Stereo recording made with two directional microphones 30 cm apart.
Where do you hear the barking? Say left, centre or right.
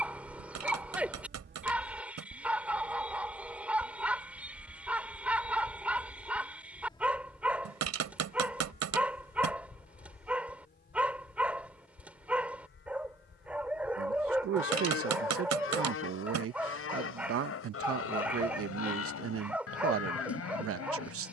centre.